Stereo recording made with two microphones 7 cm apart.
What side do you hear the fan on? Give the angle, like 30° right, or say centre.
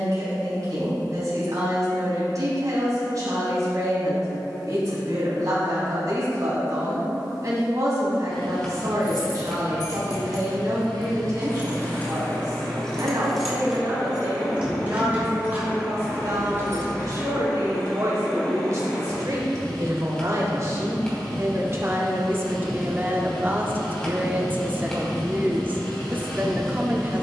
10° left.